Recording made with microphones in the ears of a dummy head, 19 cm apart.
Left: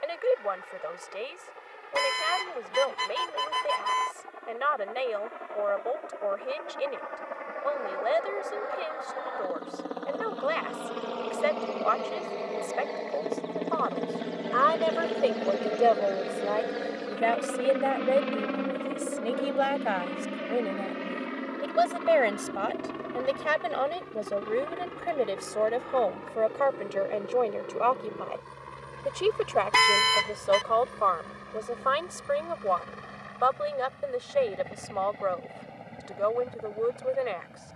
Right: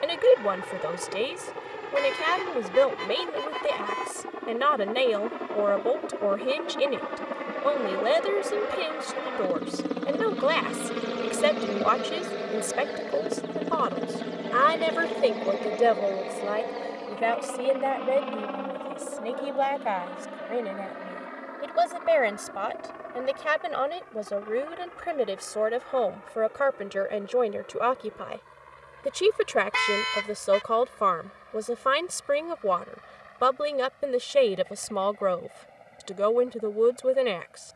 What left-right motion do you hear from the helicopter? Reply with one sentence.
You can hear the helicopter travel towards the left.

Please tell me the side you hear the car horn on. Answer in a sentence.
In this clip you hear the car horn on the left.